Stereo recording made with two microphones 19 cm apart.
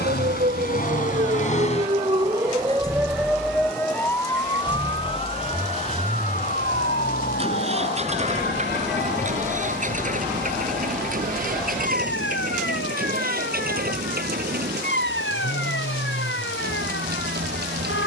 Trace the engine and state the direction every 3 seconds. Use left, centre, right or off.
left, centre, right, right, right, right.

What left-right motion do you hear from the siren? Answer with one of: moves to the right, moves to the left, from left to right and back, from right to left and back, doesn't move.
moves to the left.